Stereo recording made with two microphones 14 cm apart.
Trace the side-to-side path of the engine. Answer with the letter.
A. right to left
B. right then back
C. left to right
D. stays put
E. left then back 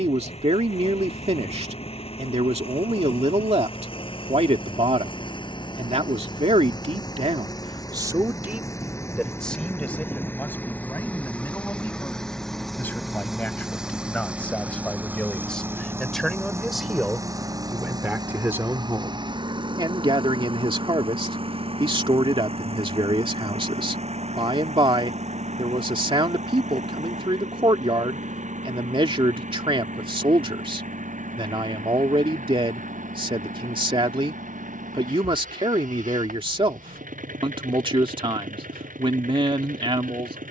C.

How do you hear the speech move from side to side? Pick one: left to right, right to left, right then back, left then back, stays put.
left then back.